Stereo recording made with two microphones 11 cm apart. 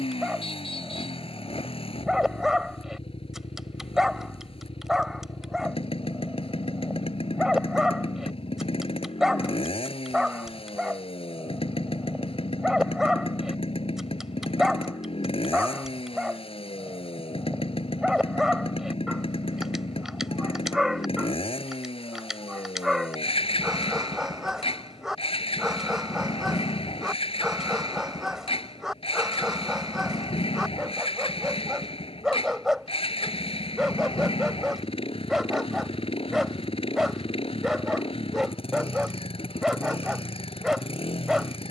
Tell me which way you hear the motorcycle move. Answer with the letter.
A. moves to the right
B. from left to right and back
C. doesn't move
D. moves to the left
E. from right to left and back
C.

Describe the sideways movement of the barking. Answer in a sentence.
In this clip you hear the barking stay put.